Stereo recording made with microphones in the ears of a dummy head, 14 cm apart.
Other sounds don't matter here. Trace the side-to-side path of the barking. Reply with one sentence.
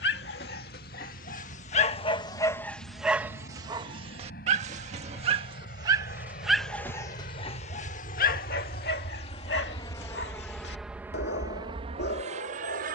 You can hear the barking move from left to right and back again.